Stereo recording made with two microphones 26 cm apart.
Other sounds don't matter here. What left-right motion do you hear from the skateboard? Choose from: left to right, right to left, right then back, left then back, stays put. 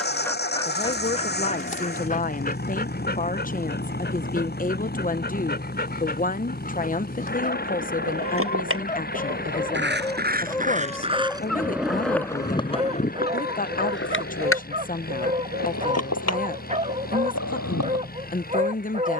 right to left.